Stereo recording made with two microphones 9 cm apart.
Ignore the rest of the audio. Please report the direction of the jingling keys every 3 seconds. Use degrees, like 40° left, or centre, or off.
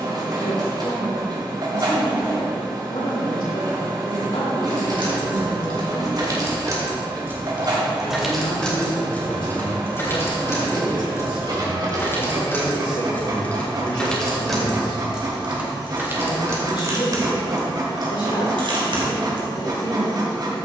off, 60° right, 20° right, 30° left, 10° left, 30° right, 60° right.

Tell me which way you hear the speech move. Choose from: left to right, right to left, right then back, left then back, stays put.
stays put.